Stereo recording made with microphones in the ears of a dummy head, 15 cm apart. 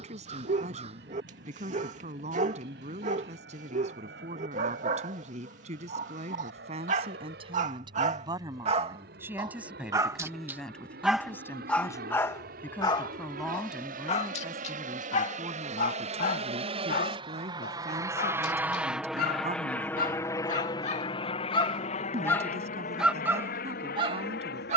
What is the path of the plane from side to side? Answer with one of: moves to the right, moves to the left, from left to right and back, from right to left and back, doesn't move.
moves to the left.